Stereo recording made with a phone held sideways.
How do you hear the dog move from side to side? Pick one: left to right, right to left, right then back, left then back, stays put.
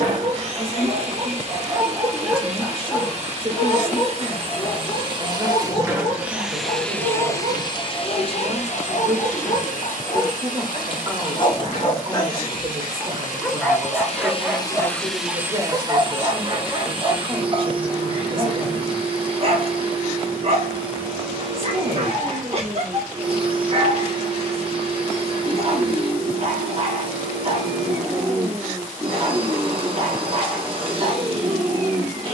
left then back.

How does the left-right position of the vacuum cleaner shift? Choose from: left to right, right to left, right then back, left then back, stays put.
left then back.